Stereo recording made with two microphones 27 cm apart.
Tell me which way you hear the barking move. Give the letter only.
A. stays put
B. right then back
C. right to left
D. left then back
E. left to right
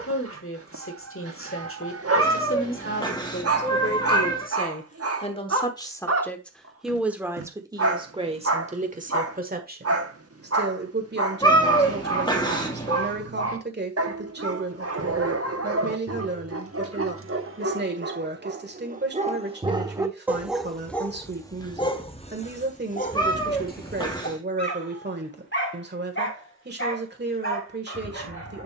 C.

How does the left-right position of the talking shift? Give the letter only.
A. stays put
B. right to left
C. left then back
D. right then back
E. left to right
E.